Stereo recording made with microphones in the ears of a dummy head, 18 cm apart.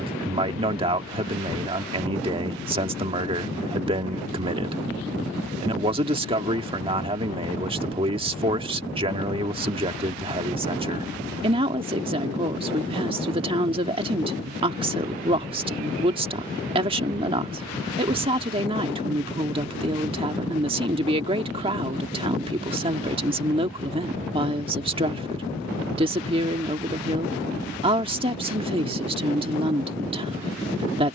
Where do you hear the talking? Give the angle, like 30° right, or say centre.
30° right.